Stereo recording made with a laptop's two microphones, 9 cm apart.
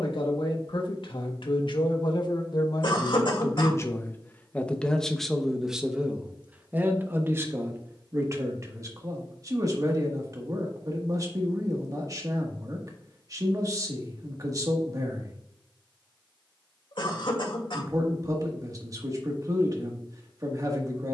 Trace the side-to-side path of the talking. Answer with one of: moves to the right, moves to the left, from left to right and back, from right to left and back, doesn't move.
moves to the right.